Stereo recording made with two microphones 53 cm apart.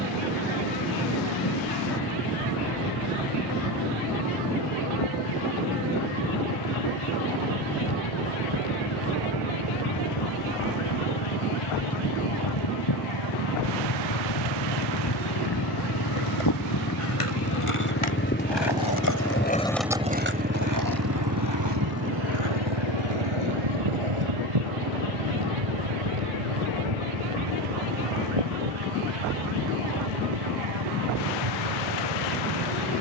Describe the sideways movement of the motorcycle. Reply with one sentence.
In this clip you hear the motorcycle go from the left side to the right.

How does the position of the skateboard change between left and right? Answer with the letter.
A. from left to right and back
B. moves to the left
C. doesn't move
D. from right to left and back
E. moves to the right
E.